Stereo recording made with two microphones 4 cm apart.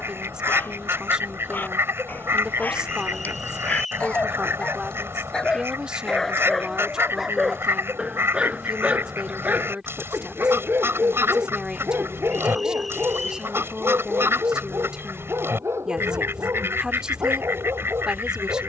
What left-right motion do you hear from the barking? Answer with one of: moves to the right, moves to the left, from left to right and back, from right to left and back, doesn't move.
moves to the right.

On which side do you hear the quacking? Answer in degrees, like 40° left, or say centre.
70° right.